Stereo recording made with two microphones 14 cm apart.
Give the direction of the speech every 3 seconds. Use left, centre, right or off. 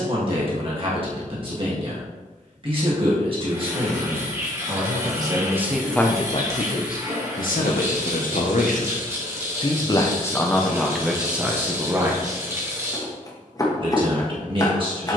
right, right, left, centre, right.